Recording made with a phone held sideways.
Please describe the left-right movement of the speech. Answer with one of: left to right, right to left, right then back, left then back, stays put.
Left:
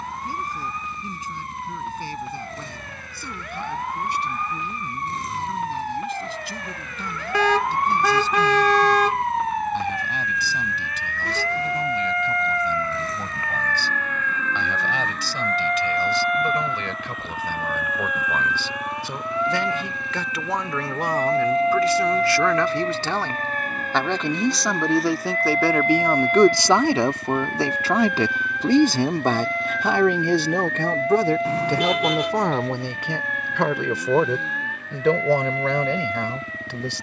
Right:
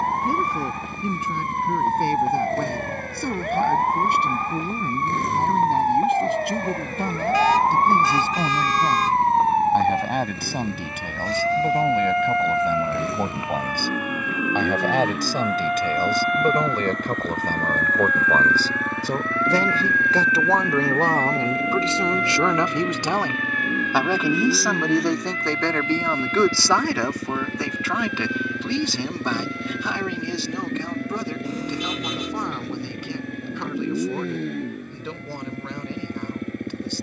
right to left.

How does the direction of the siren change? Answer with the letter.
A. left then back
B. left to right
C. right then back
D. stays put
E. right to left
E.